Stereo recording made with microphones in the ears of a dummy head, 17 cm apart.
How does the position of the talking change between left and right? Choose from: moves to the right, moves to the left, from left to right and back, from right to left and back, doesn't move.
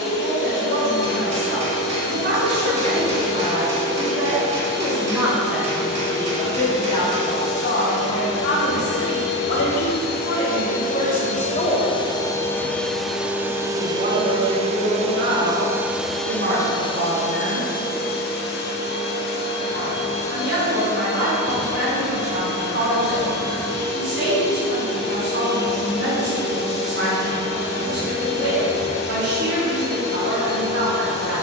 from right to left and back.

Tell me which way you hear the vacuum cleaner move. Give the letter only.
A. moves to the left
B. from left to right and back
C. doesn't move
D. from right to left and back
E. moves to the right
B.